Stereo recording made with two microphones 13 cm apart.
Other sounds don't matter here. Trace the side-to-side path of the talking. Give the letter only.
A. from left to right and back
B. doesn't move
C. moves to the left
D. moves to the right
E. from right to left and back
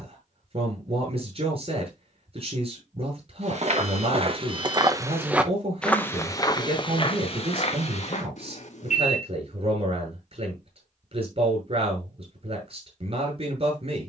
B.